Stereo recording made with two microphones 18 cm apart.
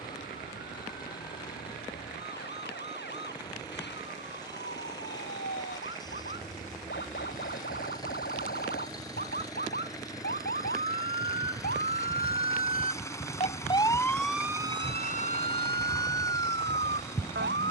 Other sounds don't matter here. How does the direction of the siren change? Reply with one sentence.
You can hear the siren go from the left side to the right.